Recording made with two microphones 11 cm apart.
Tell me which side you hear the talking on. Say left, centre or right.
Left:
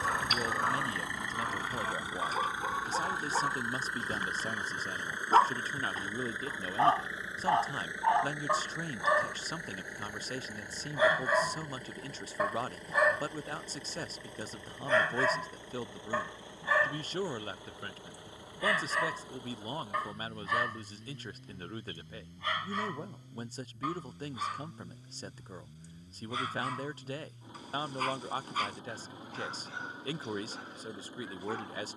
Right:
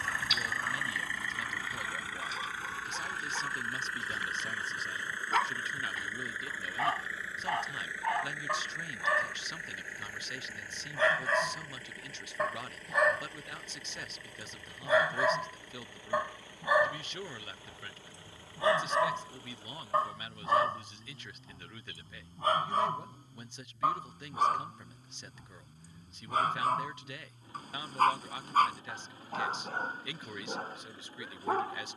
left.